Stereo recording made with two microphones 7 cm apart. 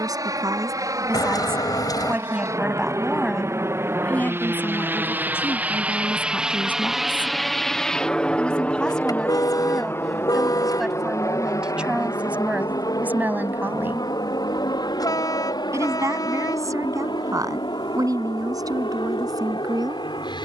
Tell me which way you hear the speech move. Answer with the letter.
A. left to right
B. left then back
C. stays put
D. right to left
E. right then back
B.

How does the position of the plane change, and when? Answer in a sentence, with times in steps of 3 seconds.
You can hear the plane on the right from 0 s, in the centre from 6 s and on the left from 9 s.